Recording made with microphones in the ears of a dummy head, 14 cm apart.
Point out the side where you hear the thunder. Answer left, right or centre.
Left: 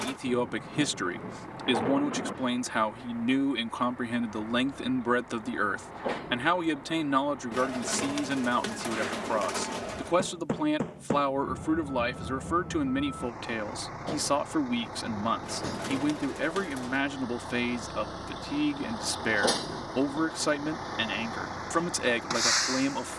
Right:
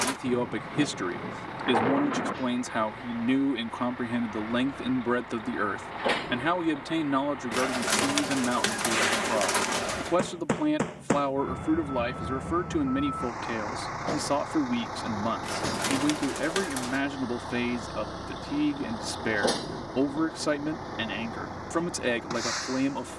right.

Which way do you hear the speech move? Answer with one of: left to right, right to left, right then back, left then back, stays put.
stays put.